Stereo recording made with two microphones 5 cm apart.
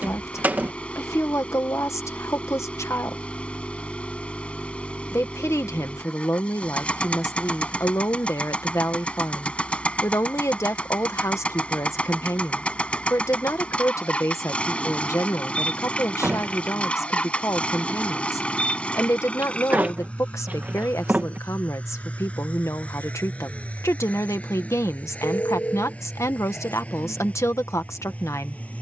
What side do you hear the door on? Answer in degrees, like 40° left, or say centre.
30° right.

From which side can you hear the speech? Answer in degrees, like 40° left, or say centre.
80° left.